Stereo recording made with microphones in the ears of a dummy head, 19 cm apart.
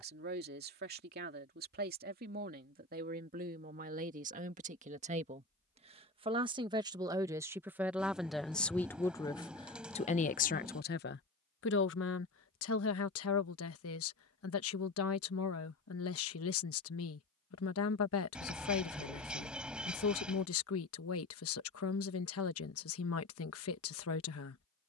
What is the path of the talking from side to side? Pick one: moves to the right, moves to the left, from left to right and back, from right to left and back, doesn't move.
moves to the left.